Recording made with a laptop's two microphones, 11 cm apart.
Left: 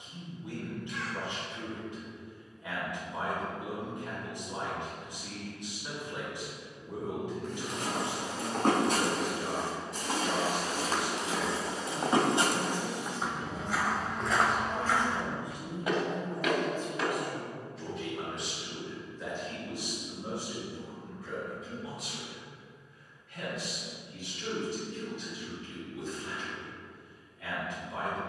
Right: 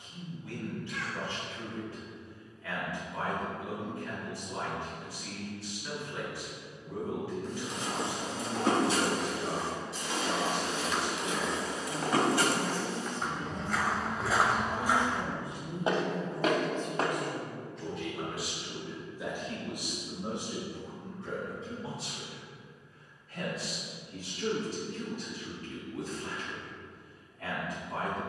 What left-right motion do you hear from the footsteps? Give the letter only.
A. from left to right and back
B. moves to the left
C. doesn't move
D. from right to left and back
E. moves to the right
E.